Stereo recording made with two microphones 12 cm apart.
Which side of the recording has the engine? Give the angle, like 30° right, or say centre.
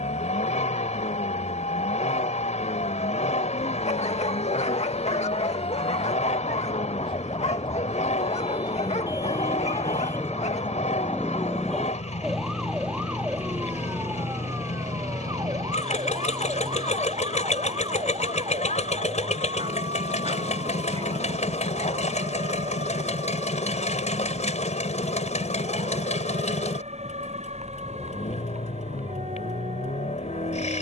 70° left.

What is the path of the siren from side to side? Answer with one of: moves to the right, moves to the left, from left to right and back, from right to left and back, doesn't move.
moves to the right.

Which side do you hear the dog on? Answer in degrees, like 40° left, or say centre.
60° left.